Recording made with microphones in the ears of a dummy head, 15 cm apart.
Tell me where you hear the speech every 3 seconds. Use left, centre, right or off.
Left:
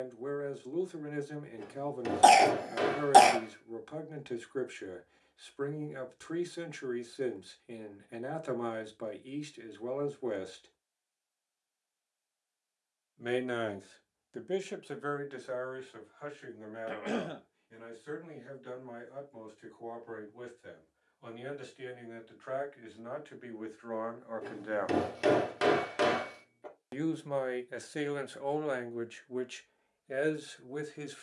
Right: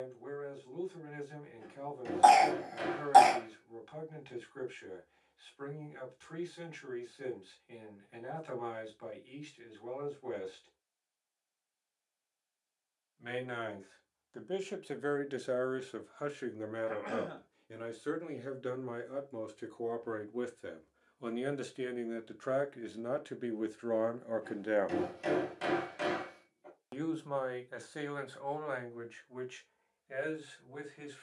left, left, left, left, left, right, right, right, right, left, left.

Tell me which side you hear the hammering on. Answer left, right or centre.
left.